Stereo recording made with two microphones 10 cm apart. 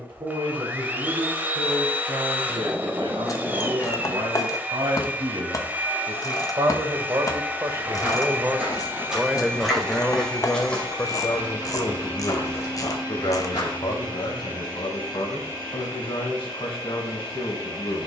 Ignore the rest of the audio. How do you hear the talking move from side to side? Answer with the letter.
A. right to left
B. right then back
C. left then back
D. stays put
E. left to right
A.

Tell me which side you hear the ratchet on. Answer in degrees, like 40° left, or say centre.
40° left.